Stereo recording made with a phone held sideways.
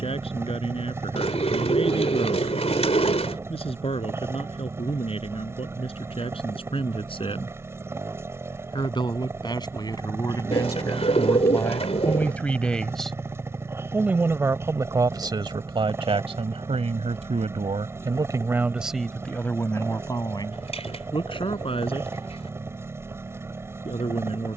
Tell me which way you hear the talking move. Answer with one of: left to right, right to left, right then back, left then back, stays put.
right then back.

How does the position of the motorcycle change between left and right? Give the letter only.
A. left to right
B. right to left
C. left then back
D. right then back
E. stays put
E.